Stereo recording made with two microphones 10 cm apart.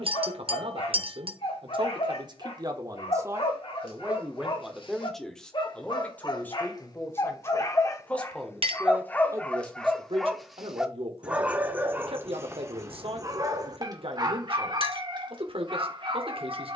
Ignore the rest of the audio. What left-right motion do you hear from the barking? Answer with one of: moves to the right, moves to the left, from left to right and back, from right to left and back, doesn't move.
moves to the right.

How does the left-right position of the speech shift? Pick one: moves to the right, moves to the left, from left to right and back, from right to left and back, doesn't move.
from right to left and back.